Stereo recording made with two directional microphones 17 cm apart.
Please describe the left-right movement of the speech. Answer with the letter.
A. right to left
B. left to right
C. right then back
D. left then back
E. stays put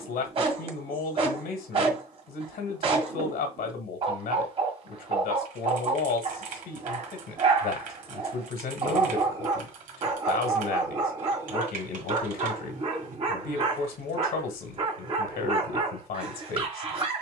E.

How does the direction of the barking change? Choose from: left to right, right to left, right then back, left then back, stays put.
stays put.